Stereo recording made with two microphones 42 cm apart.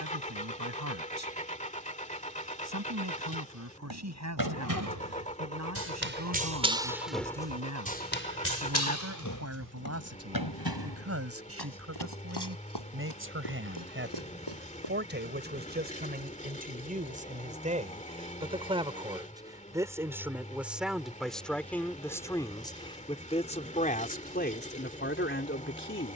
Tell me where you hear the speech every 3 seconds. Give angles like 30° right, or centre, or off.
40° right, 40° right, 40° right, 30° right, 30° right, 20° right, 10° right, 10° left, 20° left.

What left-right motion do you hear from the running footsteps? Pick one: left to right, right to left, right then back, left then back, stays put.
right to left.